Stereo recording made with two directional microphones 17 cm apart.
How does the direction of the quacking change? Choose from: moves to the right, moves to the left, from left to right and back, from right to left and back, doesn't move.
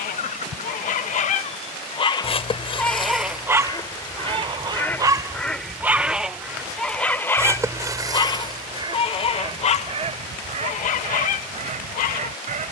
moves to the right.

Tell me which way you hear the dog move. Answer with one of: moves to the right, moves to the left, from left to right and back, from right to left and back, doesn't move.
from left to right and back.